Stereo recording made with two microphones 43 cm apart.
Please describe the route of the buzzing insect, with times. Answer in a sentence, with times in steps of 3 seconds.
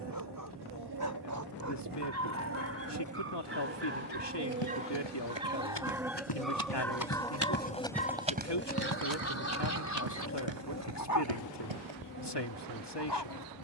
In this clip you hear the buzzing insect on the right from 0 s, in the centre from 6 s and on the left from 9 s.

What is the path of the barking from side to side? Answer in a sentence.
In this clip you hear the barking go from the right side to the left.